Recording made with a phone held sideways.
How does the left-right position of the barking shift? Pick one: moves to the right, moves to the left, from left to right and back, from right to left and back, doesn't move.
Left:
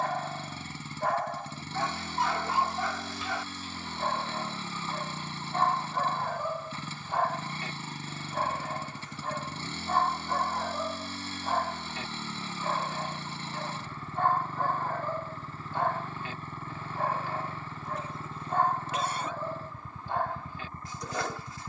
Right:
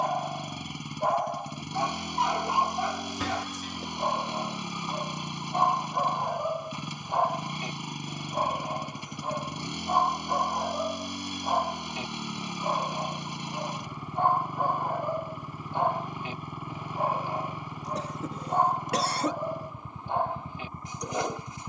doesn't move.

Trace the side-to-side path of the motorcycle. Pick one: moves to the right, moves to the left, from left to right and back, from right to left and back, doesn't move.
doesn't move.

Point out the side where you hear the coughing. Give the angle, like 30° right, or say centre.
80° right.